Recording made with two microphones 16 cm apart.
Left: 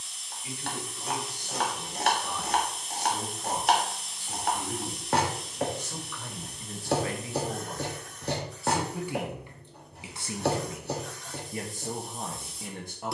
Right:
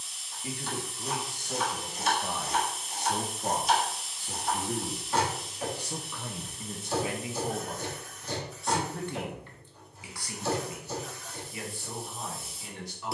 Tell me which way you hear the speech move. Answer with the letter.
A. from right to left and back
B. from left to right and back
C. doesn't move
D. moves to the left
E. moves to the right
D.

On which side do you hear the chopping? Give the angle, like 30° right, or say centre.
70° left.